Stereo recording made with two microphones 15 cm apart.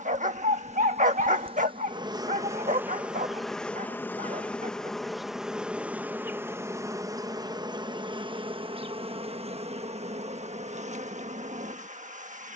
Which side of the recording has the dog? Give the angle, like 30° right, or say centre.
60° right.